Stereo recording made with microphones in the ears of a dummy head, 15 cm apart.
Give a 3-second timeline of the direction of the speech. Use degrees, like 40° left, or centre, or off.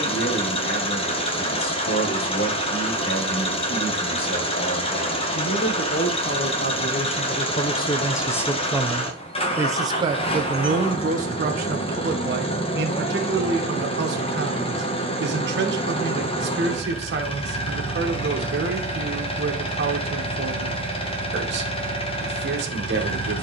60° left, 60° left, 30° left, 40° right, 60° right, 70° right, 70° right, 70° right.